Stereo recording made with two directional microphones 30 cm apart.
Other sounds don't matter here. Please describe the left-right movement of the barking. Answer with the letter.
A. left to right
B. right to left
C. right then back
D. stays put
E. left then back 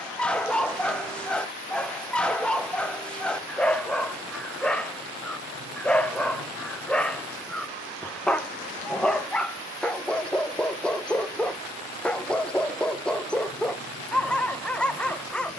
D.